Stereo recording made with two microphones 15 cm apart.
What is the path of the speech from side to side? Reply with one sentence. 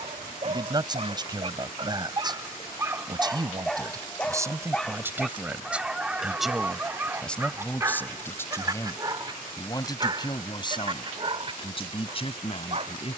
You can hear the speech travel towards the left.